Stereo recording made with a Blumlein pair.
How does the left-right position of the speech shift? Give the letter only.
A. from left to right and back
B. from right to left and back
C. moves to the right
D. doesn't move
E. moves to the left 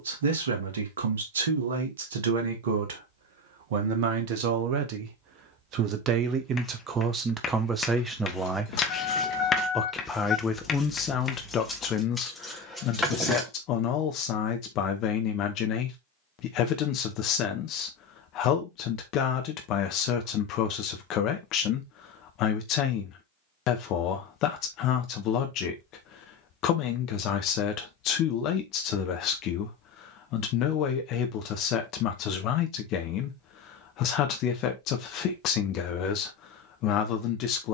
E.